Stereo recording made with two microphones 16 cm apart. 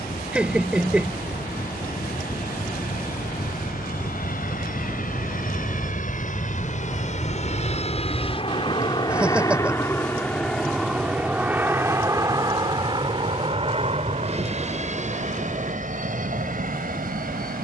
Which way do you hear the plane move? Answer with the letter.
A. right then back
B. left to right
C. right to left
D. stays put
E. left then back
B.